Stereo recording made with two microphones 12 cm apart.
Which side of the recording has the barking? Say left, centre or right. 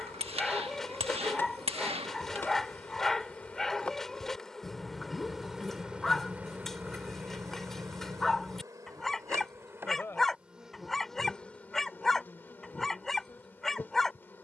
centre.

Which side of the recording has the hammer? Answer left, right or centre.
right.